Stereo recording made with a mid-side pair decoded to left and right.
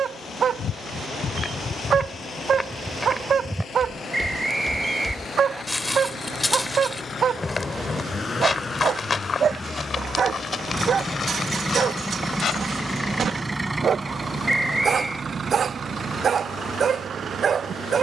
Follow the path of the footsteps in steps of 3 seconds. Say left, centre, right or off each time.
left, centre, left, left, left, off.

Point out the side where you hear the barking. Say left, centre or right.
right.